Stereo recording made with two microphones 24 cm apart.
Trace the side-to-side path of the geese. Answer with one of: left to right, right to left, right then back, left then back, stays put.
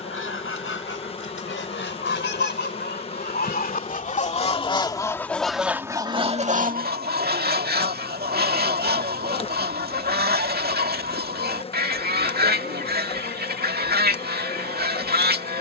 left to right.